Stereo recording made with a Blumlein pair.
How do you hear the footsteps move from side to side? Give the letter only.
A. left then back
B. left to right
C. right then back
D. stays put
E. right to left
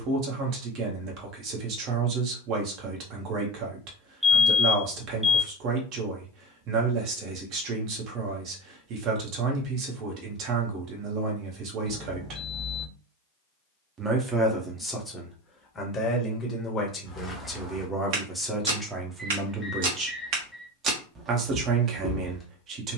C.